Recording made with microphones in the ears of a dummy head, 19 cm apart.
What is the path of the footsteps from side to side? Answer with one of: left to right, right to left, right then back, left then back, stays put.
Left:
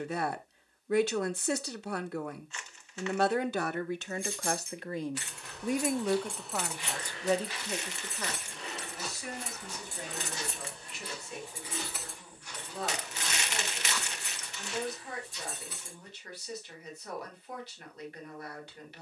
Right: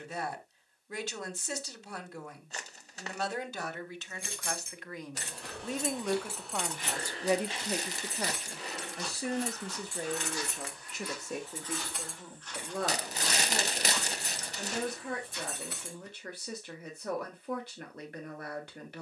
left then back.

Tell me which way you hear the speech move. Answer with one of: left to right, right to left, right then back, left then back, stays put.
left to right.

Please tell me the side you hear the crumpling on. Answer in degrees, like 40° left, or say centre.
40° right.